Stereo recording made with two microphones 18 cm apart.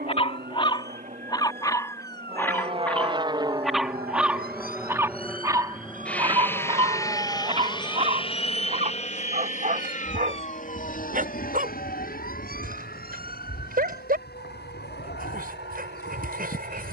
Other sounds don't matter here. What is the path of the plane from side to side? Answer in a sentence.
You can hear the plane go from the right side to the left.